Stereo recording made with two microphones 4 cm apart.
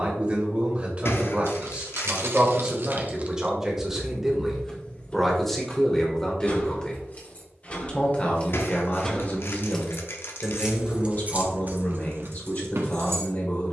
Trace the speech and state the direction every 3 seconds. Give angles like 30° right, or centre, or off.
30° right, centre, 20° left, 40° left, 40° left.